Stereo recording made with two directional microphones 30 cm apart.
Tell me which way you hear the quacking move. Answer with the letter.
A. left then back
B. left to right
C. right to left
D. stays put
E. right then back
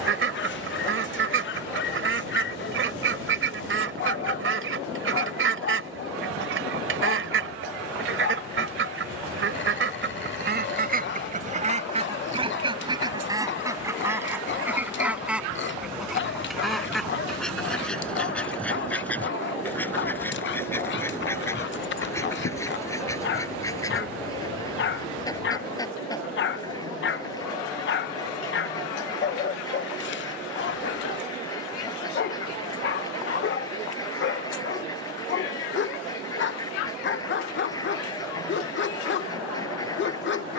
C.